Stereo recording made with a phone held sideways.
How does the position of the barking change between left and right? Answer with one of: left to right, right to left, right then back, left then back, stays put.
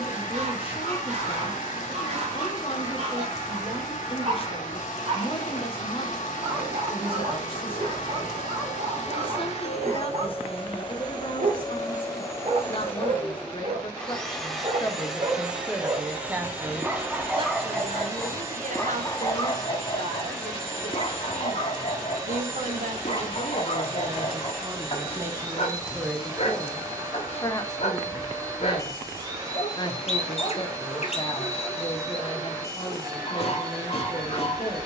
right to left.